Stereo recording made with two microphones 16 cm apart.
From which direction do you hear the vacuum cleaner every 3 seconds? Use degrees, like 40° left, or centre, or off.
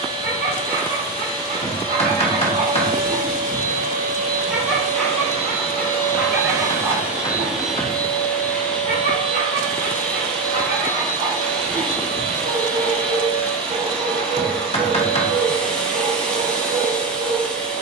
70° right, 50° right, 10° right, 10° left, 10° left, 10° left.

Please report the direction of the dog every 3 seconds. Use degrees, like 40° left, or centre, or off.
60° right, 10° right, 40° right, 70° right, 70° right, 70° right.